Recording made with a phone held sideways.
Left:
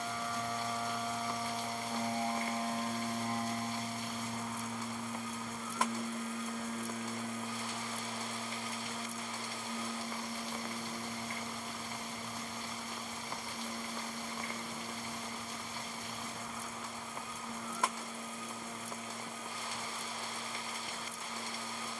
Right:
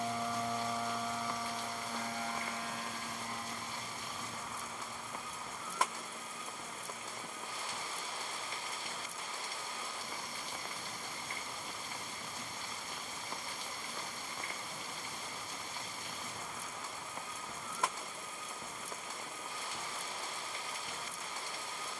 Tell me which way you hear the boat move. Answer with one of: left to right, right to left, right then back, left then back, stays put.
right to left.